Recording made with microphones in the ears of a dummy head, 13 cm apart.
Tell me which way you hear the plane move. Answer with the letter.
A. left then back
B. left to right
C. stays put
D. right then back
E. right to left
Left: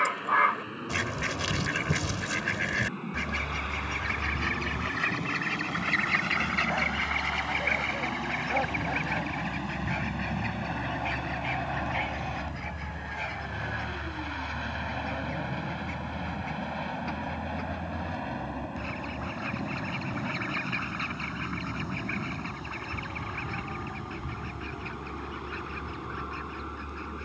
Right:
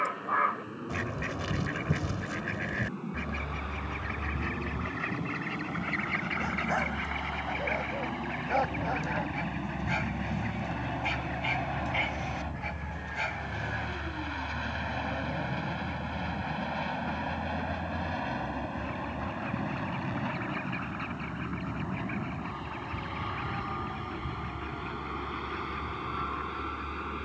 B.